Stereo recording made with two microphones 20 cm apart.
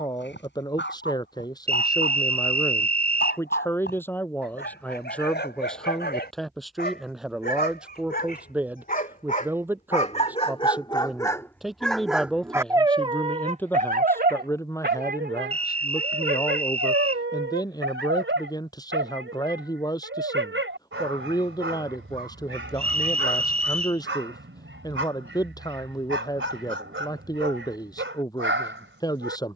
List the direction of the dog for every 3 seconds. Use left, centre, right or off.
left, left, left, left, right, right, right, right, right, right.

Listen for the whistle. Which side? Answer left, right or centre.
right.